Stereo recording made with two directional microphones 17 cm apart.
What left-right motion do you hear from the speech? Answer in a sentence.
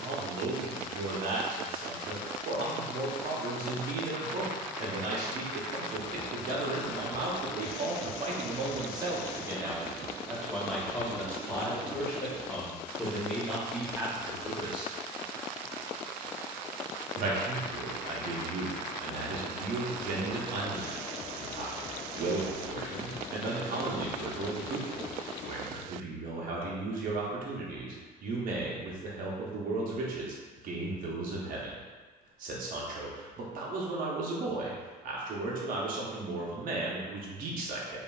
In this clip you hear the speech move from right to left and back again.